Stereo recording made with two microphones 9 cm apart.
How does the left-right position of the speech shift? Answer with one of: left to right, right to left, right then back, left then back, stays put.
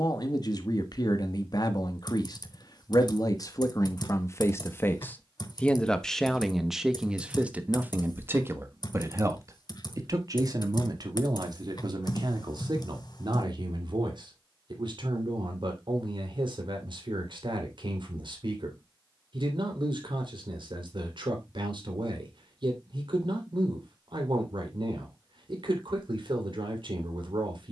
left to right.